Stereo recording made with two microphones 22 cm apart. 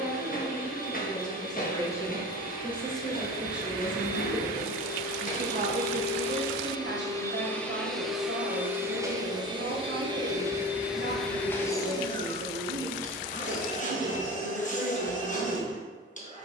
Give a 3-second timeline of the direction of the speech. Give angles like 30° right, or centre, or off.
20° left, 20° right, 60° right, 60° right, 60° right, 60° right.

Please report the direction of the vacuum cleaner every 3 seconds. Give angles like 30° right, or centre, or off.
40° left, 40° left, 10° left, 10° right, 30° left, 40° left.